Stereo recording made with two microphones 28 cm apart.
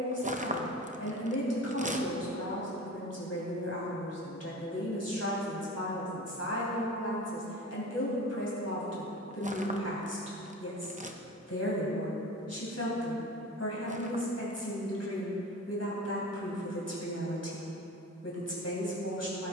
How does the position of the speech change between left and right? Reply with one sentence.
You can hear the speech stay put.